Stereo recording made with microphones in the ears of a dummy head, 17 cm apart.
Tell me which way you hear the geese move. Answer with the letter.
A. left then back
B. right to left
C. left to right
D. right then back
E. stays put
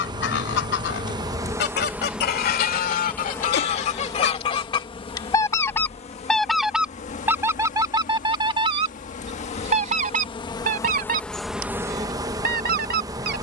C.